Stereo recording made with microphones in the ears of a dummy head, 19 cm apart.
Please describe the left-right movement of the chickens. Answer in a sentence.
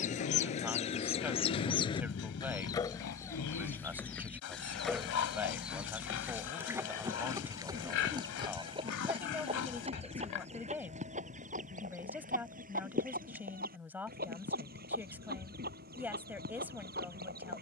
In this clip you hear the chickens move to the right.